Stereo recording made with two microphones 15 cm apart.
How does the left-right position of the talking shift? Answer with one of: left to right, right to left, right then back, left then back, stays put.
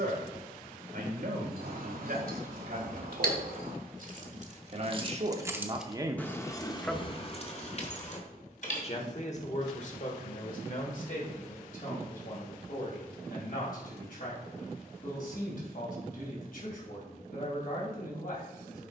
right to left.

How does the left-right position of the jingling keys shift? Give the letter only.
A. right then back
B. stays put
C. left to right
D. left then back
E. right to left
E.